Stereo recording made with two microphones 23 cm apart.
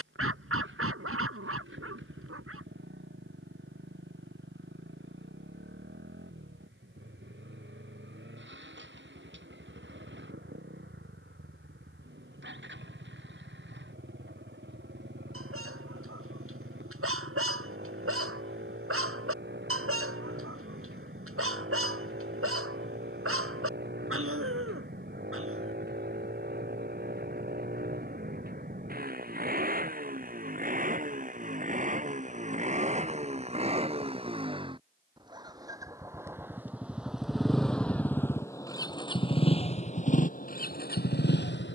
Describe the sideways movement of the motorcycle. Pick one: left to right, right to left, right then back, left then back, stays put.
right to left.